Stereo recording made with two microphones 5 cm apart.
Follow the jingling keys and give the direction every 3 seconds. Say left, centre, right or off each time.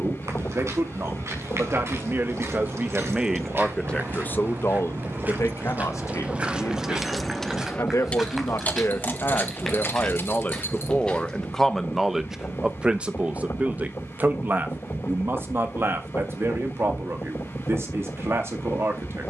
right, right, centre, left, off, off, off.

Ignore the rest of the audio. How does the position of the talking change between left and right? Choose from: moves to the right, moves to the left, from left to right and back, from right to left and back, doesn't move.
from right to left and back.